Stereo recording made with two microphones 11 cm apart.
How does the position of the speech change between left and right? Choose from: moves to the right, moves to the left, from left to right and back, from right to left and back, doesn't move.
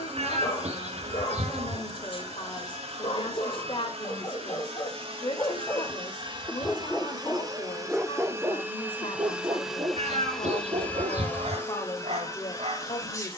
doesn't move.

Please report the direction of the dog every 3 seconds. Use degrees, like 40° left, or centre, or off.
50° left, 40° left, centre, 50° right, 70° right.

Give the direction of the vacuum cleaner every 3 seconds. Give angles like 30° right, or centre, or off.
60° right, 60° right, 30° right, 10° left, 30° left.